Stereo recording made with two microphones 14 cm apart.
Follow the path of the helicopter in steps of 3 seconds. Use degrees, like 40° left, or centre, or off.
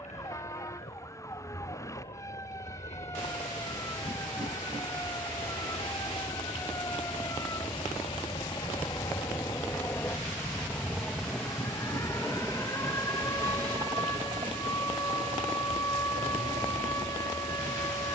60° left, 50° left, 40° left, 10° left, 20° right, 50° right.